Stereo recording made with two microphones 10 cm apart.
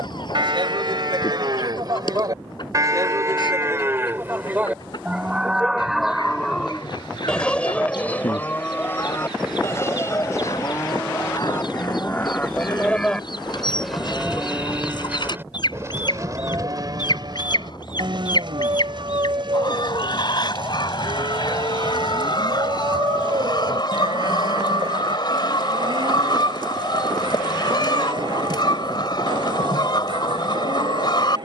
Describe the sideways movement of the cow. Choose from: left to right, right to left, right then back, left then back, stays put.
left then back.